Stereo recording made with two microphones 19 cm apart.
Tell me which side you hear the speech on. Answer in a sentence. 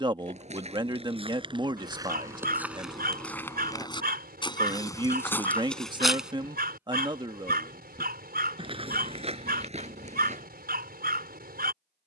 You can hear the speech on the right.